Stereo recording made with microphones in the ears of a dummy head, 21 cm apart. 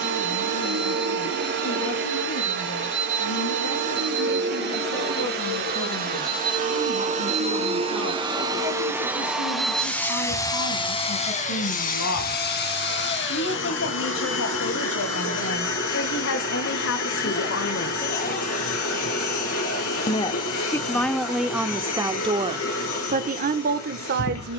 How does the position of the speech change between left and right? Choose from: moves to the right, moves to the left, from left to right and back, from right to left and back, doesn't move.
moves to the right.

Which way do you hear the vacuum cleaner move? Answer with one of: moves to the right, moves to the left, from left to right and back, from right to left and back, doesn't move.
moves to the left.